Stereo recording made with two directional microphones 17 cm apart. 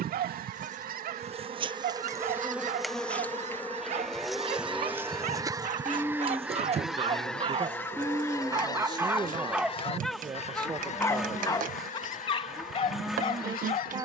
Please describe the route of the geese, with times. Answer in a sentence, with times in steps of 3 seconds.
In this clip you hear the geese on the right from 0 s, in the centre from 6 s and on the left from 9 s.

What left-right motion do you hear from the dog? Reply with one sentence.
You can hear the dog go from the right side to the left.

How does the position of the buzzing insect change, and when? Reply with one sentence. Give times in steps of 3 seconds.
You can hear the buzzing insect on the right from 0 s, in the centre from 3 s and on the right from 6 s.